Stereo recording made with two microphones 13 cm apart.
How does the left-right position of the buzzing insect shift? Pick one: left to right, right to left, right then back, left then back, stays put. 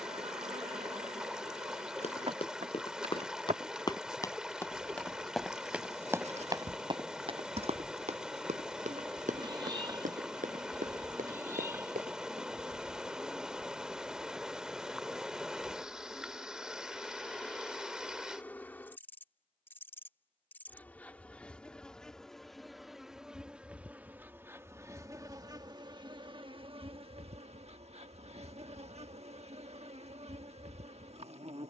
left then back.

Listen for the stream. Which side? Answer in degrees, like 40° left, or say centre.
10° right.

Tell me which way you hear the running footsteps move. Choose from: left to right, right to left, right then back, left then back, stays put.
left to right.